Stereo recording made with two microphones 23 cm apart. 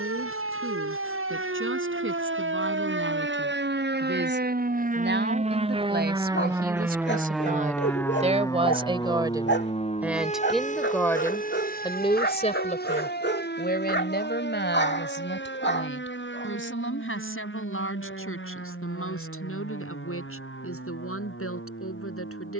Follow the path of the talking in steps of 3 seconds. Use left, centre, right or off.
right, right, right, centre, left, left, left, left.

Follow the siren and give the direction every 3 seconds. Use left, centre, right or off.
right, right, centre, left, left, left, left, left.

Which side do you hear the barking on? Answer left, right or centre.
left.